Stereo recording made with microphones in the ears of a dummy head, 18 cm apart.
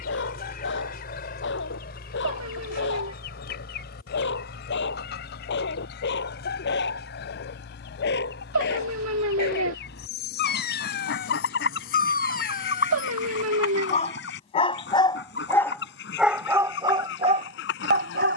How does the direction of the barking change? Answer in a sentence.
You can hear the barking move from left to right.